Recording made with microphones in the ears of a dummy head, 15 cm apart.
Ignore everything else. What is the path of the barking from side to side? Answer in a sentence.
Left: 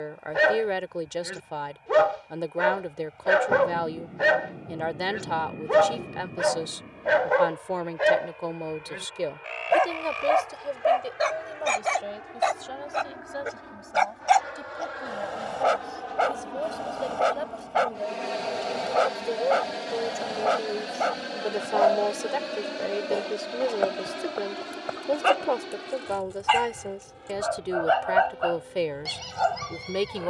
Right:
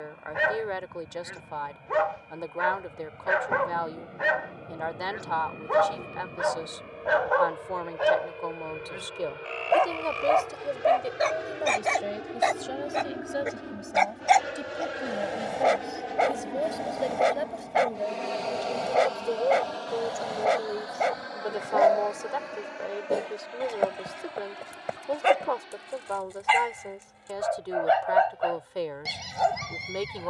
In this clip you hear the barking move to the right.